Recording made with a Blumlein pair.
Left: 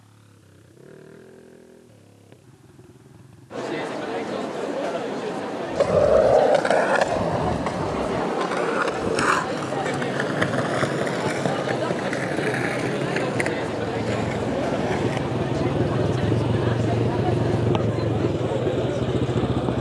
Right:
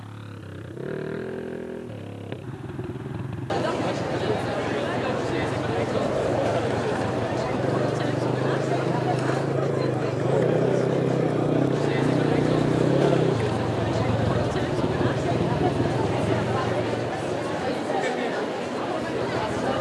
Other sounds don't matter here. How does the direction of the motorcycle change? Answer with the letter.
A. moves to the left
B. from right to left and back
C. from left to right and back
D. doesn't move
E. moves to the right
A.